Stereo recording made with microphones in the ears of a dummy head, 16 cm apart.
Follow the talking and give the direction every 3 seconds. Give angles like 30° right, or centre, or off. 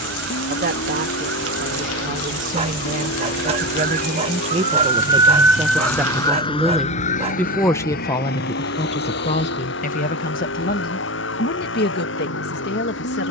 50° right, 30° right, 10° left, 50° left, 70° left.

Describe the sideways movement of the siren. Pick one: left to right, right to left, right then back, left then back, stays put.
right to left.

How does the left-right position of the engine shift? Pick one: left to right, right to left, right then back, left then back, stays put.
stays put.